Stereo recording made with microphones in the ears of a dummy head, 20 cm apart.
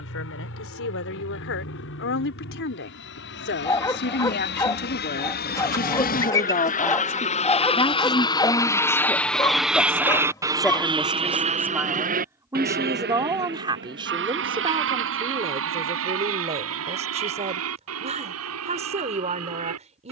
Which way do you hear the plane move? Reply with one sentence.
In this clip you hear the plane move to the right.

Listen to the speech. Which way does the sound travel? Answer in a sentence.
You can hear the speech travel towards the right.